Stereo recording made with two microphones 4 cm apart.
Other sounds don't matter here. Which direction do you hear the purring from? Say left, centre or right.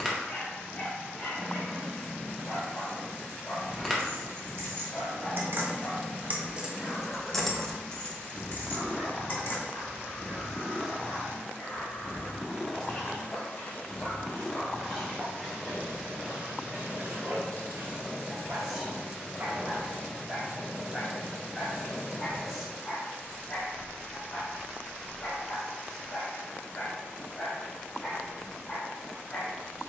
centre.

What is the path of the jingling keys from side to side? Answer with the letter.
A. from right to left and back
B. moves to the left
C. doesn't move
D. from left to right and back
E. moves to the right
B.